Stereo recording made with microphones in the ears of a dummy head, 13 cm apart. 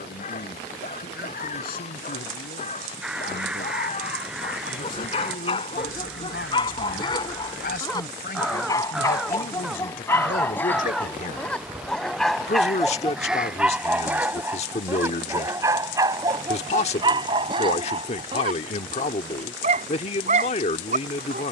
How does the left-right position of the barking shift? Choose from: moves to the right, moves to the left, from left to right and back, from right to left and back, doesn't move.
moves to the right.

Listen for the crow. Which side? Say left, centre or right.
centre.